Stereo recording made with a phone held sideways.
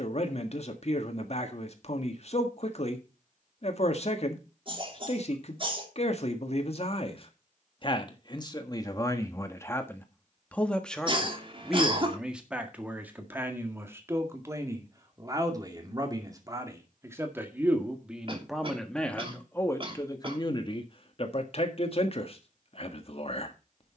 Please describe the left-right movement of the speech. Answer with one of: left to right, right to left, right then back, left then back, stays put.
right then back.